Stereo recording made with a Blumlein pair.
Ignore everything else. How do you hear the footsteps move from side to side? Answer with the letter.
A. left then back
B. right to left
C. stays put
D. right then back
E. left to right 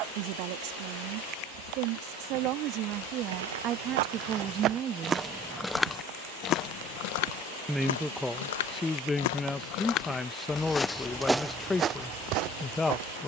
A.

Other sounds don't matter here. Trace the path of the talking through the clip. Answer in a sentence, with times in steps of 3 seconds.
In this clip you hear the talking on the right from 0 s and in the centre from 6 s.